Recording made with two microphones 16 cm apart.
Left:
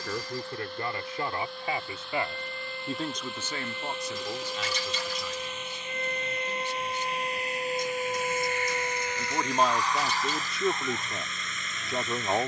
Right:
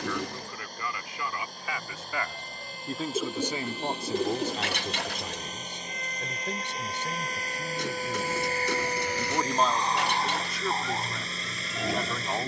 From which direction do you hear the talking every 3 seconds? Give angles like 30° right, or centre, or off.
30° left, 30° right, 70° right, 20° left.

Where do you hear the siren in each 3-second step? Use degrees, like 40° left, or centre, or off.
60° left, 50° left, 20° left, 40° right.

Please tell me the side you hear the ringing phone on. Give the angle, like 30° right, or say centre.
60° right.